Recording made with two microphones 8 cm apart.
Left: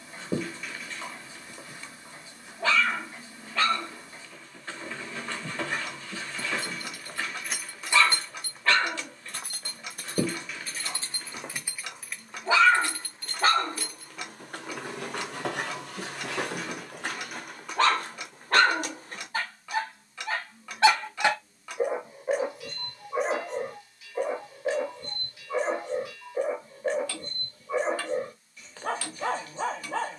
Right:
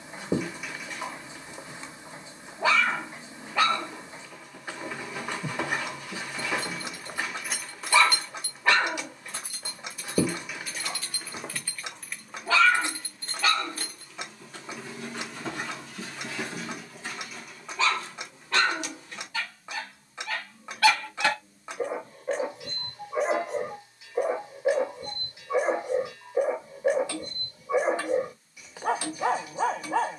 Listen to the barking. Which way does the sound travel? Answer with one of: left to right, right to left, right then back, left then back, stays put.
left then back.